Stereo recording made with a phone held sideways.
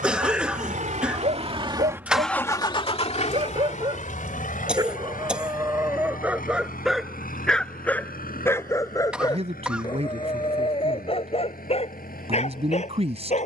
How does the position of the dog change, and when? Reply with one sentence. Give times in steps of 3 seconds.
In this clip you hear the dog on the right from 0 s, in the centre from 6 s and on the left from 9 s.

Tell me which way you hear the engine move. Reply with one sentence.
In this clip you hear the engine go from the right side to the left.